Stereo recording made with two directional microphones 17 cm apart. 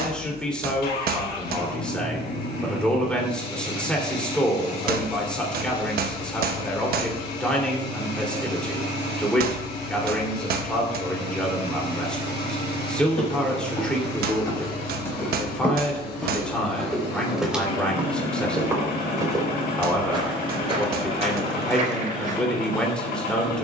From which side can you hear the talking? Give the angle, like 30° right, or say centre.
10° left.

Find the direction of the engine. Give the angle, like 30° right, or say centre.
70° left.